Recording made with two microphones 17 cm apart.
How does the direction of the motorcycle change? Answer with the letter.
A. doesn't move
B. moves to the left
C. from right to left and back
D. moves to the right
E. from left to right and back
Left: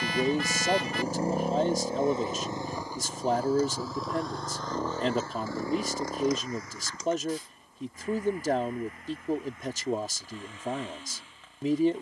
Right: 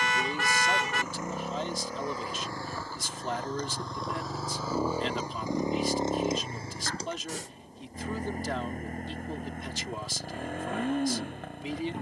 D.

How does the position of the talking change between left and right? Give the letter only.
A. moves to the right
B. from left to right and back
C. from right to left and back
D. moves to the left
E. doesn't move
E.